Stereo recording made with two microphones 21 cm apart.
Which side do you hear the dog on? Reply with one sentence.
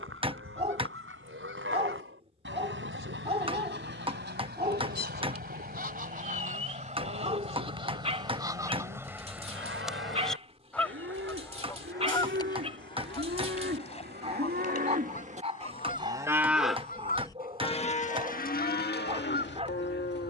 In this clip you hear the dog on the right.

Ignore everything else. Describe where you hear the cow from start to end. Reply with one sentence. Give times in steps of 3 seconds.
In this clip you hear the cow on the right from 0 s, in the centre from 15 s and on the left from 18 s.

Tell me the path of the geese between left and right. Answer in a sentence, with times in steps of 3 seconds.
You can hear the geese on the right from 0 s, in the centre from 9 s and on the left from 12 s.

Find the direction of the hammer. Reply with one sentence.
You can hear the hammer on the right.